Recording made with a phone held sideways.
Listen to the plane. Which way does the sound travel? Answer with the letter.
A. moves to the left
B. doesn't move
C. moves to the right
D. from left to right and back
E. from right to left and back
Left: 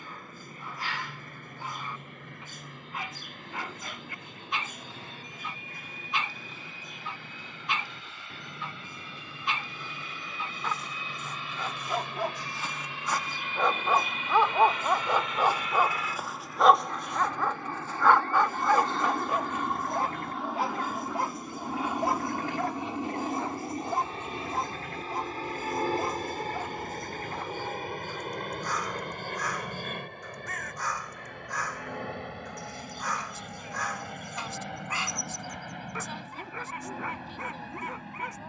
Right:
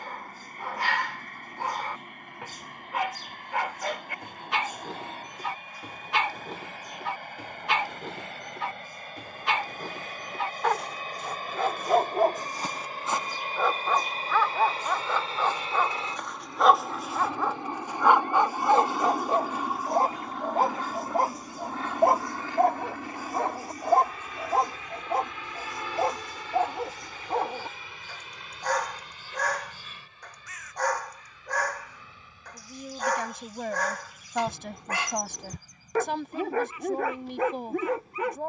A.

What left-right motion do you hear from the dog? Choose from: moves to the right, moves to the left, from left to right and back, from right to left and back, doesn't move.
from right to left and back.